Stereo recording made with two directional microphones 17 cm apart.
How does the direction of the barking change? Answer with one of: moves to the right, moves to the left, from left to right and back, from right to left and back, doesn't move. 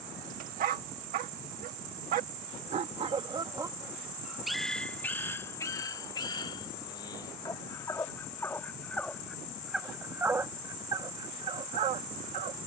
from right to left and back.